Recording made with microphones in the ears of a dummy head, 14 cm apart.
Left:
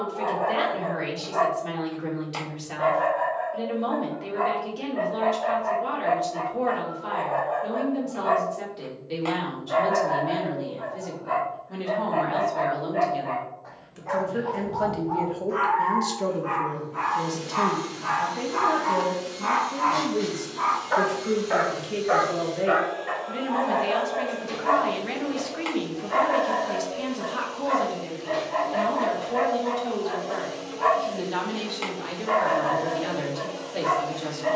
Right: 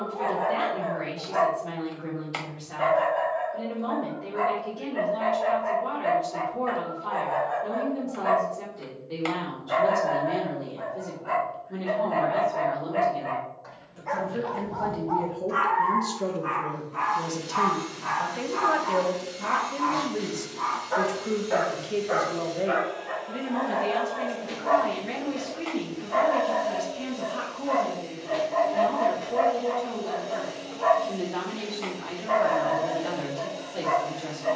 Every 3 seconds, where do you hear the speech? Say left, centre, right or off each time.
left, left, left, left, left, centre, right, centre, left, left, left, left.